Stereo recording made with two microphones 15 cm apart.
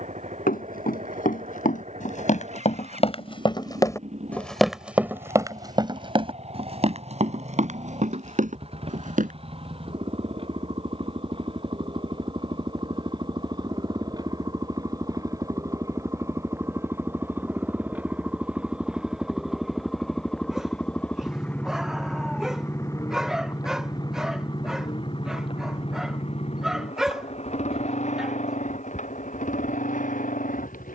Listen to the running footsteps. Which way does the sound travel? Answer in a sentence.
In this clip you hear the running footsteps move to the right.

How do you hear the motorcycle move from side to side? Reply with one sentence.
In this clip you hear the motorcycle go from the right side to the left.